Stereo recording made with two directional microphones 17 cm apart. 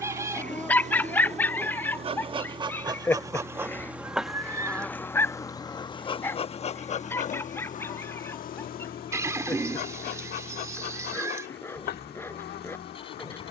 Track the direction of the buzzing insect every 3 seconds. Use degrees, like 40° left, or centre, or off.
40° right, centre, 50° left, 70° left, 70° left.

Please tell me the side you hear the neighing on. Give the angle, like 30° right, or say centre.
20° right.